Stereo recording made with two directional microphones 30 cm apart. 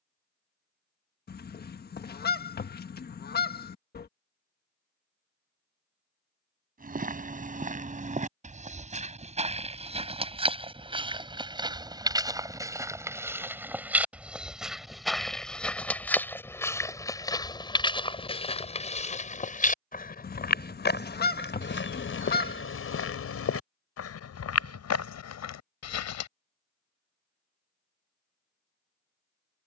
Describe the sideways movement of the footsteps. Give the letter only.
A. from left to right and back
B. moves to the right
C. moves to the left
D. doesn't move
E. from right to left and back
C.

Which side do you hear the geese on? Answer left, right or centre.
left.